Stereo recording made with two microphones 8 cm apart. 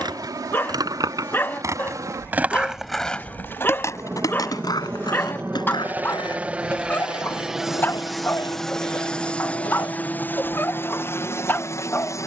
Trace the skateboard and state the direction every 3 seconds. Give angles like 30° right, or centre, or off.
40° right, 50° left, 80° left, 80° left.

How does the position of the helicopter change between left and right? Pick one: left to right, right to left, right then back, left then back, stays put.
right to left.